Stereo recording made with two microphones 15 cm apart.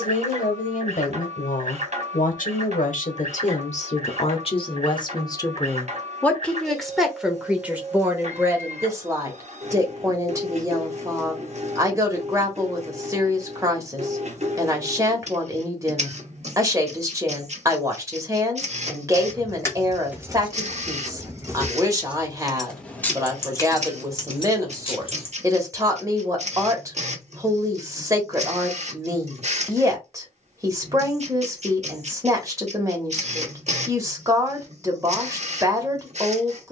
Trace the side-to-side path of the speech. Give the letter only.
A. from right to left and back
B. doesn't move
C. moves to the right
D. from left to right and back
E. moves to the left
C.